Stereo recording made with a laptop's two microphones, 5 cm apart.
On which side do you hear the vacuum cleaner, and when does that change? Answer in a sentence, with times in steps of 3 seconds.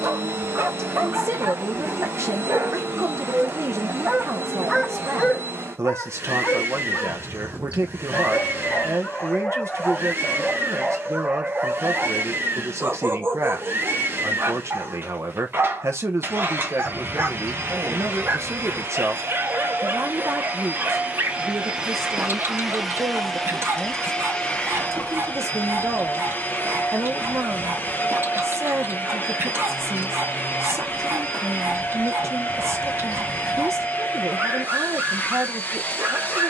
In this clip you hear the vacuum cleaner on the right from 0 s, in the centre from 21 s and on the left from 24 s.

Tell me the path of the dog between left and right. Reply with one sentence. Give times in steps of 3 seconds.
You can hear the dog on the right from 0 s, in the centre from 3 s, on the left from 6 s, in the centre from 9 s and on the right from 12 s.